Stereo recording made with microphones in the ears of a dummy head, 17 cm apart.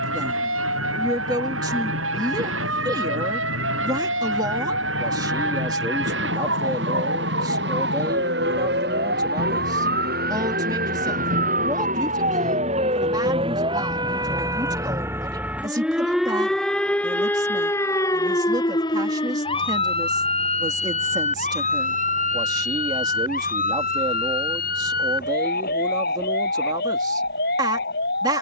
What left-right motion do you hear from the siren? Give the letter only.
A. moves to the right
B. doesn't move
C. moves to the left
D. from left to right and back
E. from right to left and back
C.